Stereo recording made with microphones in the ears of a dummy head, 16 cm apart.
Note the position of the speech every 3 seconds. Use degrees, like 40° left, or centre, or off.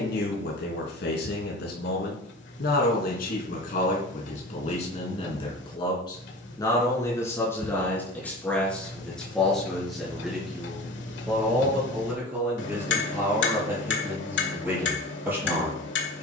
60° left, 40° left, 10° left, centre, 10° right, 10° right.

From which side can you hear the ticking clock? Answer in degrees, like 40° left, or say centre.
70° left.